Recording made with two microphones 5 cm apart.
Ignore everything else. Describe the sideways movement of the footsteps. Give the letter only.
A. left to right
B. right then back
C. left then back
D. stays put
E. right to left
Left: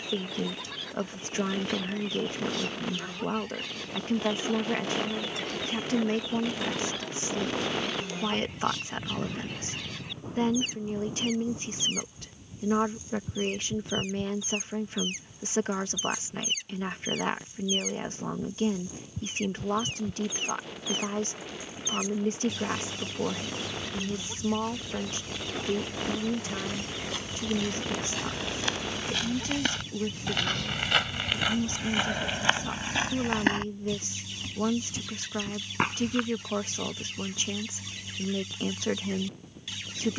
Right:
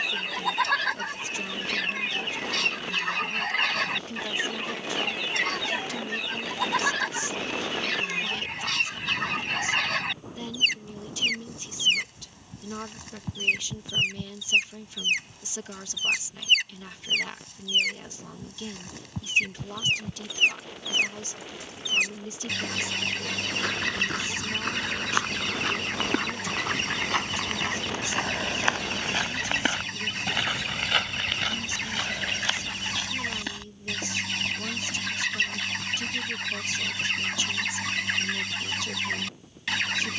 E.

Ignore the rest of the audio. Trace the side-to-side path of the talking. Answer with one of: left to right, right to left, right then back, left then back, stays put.
stays put.